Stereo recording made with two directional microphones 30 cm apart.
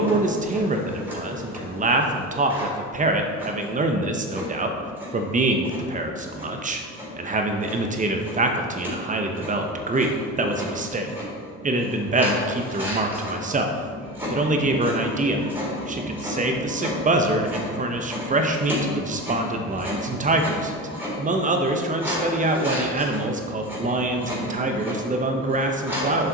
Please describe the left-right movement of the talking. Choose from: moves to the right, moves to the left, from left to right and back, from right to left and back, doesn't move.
doesn't move.